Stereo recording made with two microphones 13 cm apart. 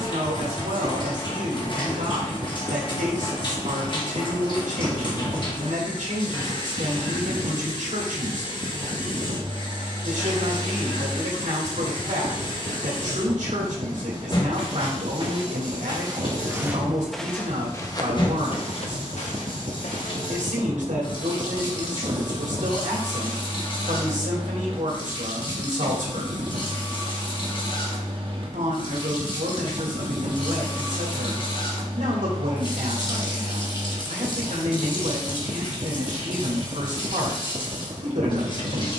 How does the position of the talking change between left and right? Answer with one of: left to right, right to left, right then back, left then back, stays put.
stays put.